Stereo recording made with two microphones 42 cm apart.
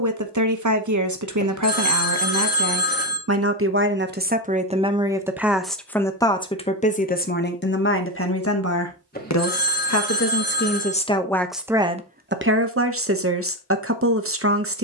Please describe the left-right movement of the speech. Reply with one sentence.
In this clip you hear the speech move from right to left and back again.